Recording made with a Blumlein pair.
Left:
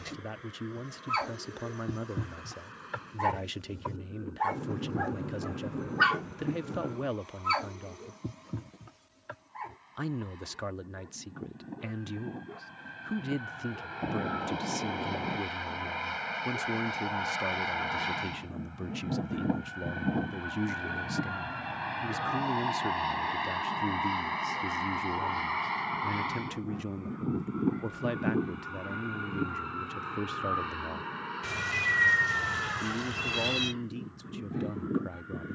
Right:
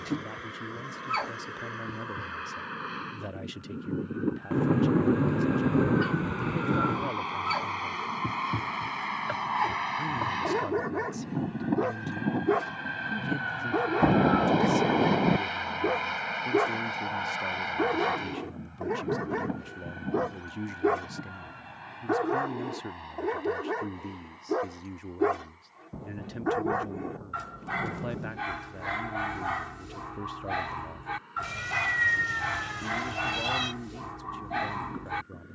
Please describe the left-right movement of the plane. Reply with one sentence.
In this clip you hear the plane travel towards the left.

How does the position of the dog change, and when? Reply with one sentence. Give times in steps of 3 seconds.
In this clip you hear the dog in the centre from 0 s, on the left from 3 s, in the centre from 6 s and on the right from 9 s.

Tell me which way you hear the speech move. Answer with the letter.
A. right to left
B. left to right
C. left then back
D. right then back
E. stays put
E.